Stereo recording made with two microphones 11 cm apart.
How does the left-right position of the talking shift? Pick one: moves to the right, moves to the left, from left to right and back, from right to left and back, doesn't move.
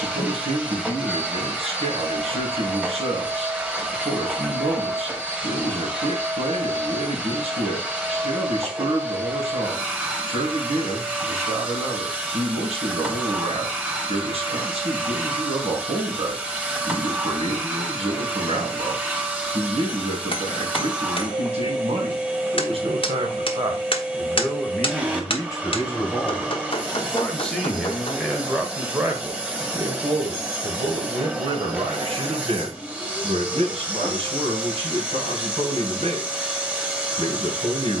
from right to left and back.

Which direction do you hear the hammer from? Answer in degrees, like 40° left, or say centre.
60° left.